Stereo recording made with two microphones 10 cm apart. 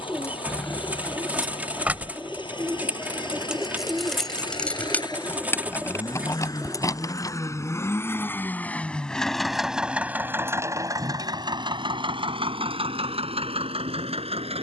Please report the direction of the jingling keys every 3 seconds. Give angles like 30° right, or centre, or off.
centre, 10° left, 30° left, off, off.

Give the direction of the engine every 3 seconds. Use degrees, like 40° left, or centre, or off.
60° left, 50° left, 30° left, 20° right, 70° right.